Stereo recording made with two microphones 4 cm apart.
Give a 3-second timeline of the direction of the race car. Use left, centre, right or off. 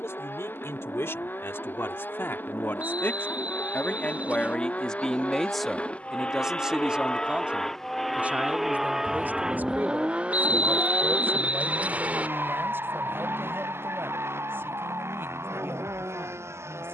left, left, centre, right, right, right.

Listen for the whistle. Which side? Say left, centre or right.
right.